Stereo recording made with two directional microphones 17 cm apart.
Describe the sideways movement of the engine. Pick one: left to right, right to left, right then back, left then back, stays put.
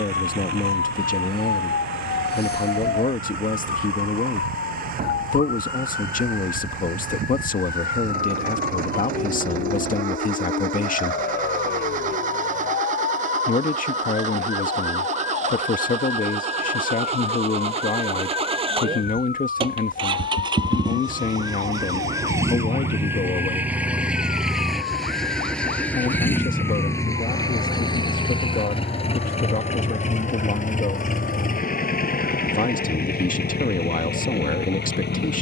right to left.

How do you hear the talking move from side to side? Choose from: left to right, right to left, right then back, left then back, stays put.
stays put.